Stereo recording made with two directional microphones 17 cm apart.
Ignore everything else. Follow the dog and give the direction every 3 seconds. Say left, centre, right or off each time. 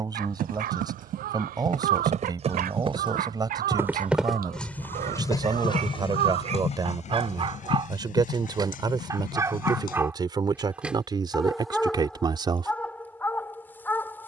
right, right, right, centre, centre.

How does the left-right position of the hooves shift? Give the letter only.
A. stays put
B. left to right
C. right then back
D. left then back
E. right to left
E.